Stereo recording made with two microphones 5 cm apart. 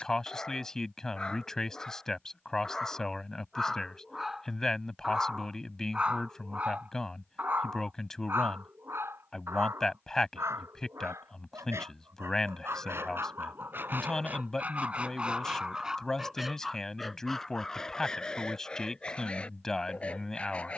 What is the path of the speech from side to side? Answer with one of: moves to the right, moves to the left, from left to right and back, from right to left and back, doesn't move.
doesn't move.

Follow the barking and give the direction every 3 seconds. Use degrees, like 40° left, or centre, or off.
10° left, 10° right, 40° right, 70° right, 50° right, 10° right, 20° left.